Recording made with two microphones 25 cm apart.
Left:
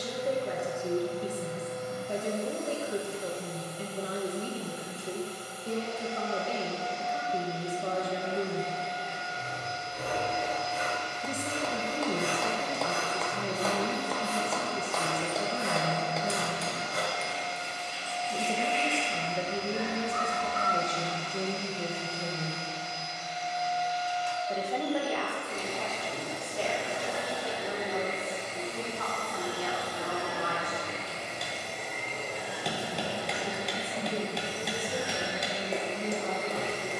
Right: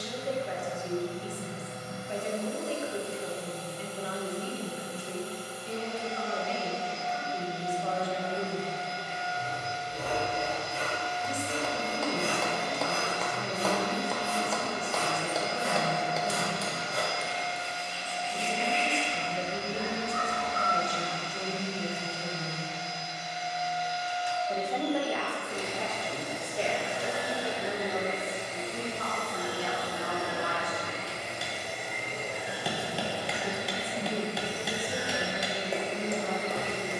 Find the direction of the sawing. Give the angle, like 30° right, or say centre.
30° right.